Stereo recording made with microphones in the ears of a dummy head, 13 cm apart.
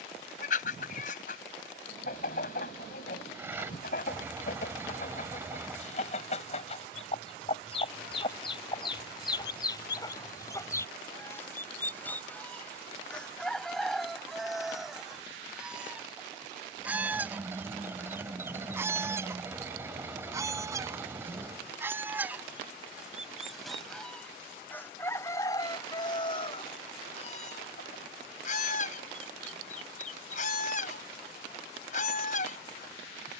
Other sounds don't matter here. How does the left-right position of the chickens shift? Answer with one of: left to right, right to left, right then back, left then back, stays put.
right then back.